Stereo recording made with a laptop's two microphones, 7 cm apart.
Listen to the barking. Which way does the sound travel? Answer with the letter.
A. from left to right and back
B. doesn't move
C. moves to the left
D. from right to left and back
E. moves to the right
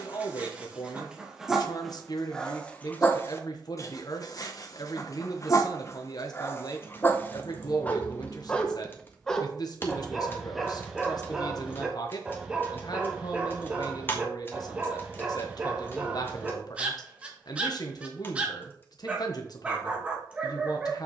D.